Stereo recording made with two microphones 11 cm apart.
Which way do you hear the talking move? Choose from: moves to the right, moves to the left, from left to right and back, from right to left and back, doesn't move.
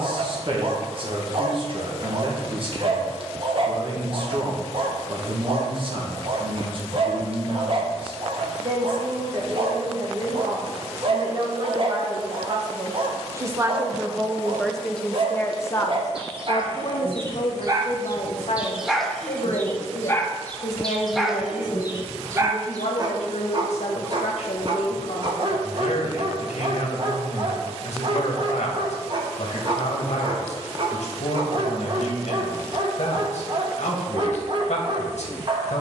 moves to the left.